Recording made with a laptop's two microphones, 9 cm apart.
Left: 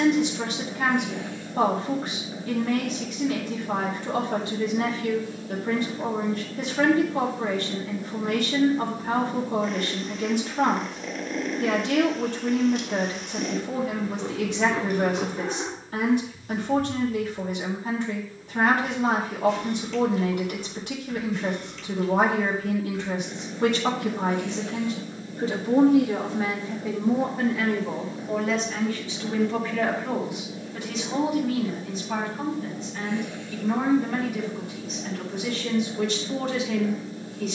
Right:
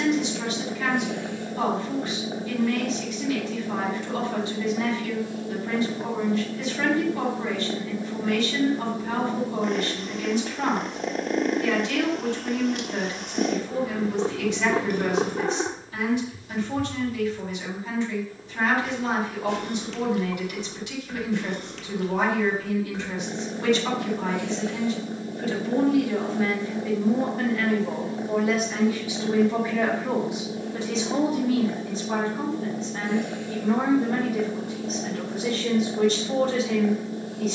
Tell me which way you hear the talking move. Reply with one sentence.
In this clip you hear the talking move to the right.